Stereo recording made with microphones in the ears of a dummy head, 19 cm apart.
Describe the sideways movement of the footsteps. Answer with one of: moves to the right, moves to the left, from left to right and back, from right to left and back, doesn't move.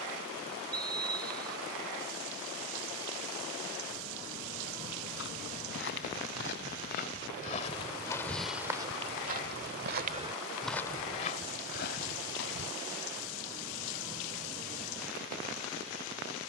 from left to right and back.